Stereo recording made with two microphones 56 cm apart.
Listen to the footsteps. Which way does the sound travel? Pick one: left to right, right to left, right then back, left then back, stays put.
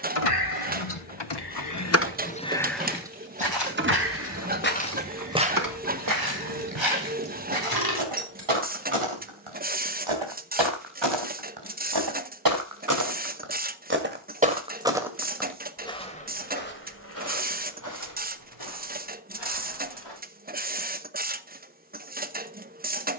right then back.